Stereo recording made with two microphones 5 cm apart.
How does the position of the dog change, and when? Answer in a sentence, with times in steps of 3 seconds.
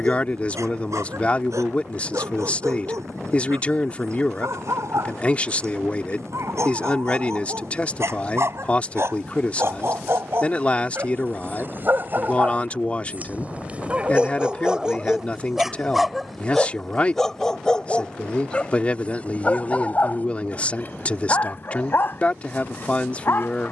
You can hear the dog on the right from 0 s, in the centre from 15 s and on the left from 18 s.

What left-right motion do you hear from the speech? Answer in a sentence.
In this clip you hear the speech stay in one place.